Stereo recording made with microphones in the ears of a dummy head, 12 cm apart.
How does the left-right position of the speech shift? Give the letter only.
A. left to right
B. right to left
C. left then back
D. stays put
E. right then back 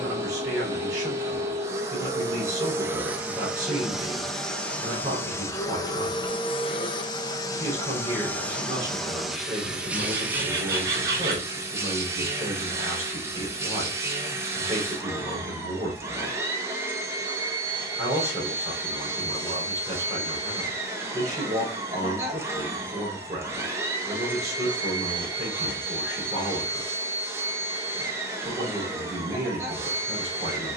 D.